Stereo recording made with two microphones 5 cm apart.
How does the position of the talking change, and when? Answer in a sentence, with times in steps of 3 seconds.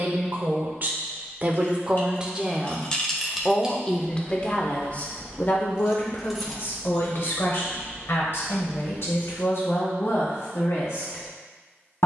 You can hear the talking on the right from 0 s and on the left from 3 s.